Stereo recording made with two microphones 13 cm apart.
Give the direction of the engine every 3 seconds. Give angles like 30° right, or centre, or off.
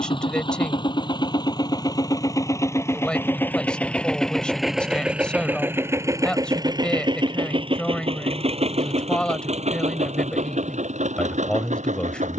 30° left, centre, 40° right, 70° right.